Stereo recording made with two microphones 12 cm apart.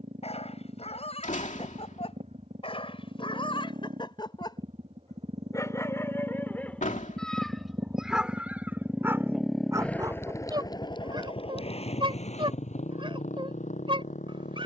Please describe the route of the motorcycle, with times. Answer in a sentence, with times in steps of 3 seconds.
You can hear the motorcycle on the right from 0 s and on the left from 9 s.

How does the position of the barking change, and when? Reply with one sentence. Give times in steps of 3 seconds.
In this clip you hear the barking on the left from 0 s, in the centre from 6 s and on the right from 9 s.